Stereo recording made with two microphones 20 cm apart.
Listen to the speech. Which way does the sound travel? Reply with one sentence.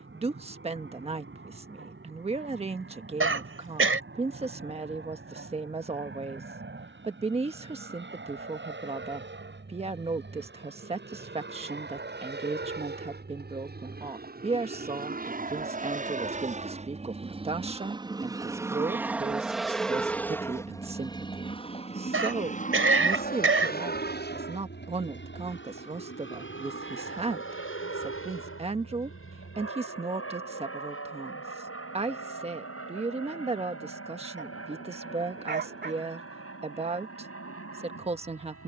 In this clip you hear the speech stay put.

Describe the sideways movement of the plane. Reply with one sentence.
In this clip you hear the plane go from the right side to the left.